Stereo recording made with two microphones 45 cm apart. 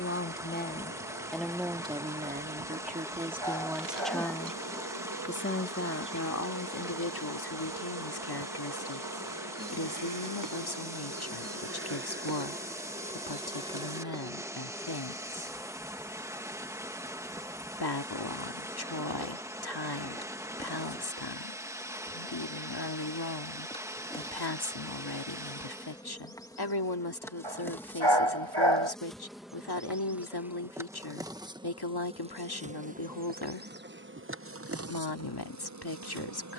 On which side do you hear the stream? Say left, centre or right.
centre.